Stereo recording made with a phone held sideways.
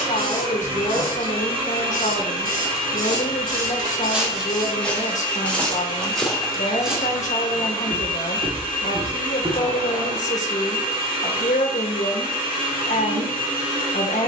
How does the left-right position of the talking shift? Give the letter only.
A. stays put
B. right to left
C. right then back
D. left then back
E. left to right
A.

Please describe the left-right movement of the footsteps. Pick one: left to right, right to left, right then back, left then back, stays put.
left then back.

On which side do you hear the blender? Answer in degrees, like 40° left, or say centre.
40° right.